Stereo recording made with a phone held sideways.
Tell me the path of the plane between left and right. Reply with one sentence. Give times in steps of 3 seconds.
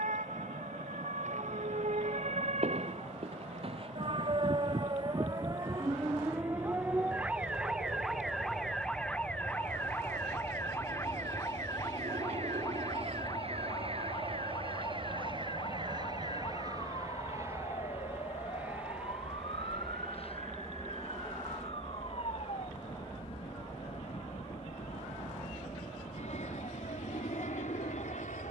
You can hear the plane on the right from 0 s, in the centre from 18 s and on the left from 21 s.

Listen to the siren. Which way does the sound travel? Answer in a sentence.
In this clip you hear the siren move from right to left.